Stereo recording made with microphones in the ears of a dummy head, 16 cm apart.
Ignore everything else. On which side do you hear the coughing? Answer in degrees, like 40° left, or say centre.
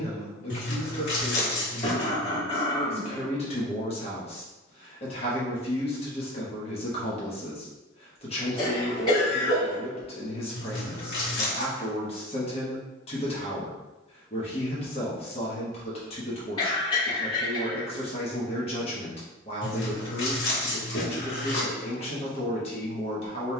30° left.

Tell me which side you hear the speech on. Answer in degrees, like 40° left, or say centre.
30° left.